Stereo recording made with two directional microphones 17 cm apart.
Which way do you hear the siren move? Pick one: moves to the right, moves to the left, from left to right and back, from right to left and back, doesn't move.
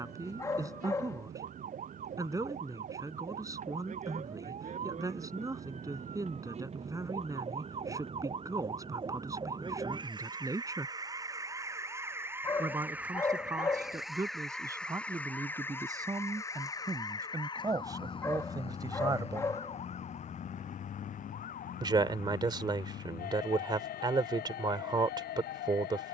moves to the left.